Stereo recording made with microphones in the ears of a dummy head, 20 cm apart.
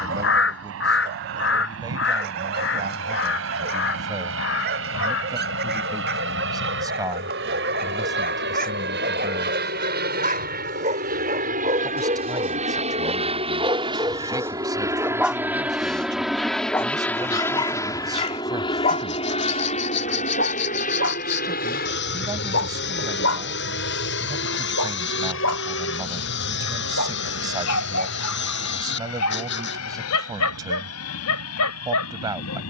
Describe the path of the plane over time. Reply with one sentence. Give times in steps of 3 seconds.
In this clip you hear the plane on the right from 0 s, in the centre from 15 s and on the left from 18 s.